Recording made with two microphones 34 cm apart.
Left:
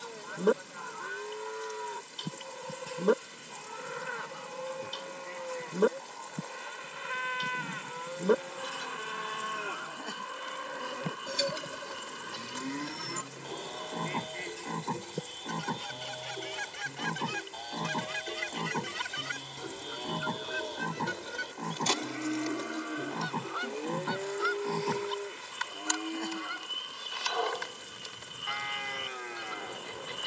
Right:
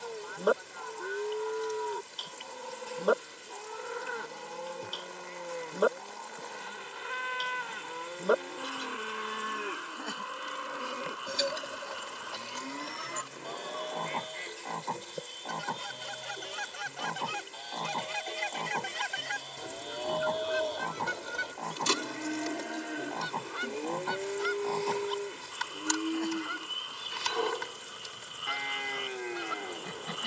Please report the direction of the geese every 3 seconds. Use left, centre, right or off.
left, left, left, left, left, left, centre, right, right, right.